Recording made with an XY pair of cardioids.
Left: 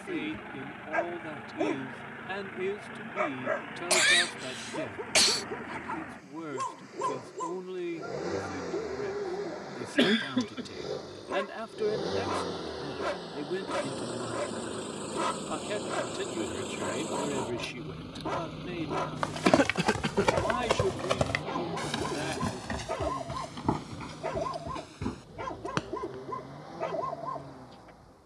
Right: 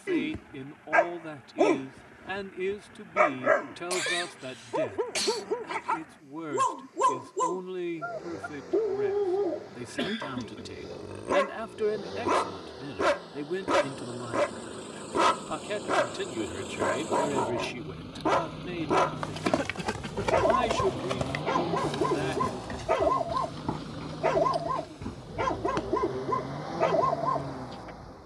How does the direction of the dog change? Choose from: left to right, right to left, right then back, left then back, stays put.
stays put.